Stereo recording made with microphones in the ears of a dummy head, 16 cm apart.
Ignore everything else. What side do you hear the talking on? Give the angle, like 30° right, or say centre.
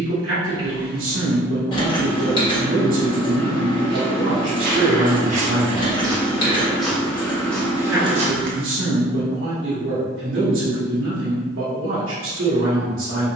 70° right.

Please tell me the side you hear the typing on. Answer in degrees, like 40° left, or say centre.
30° left.